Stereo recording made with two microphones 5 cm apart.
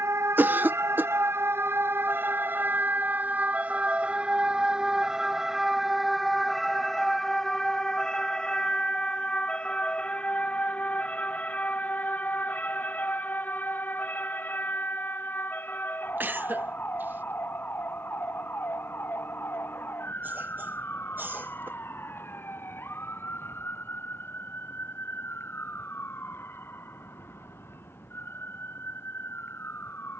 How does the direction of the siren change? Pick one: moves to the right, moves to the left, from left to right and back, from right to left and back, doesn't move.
moves to the left.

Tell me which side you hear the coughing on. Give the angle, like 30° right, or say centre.
40° right.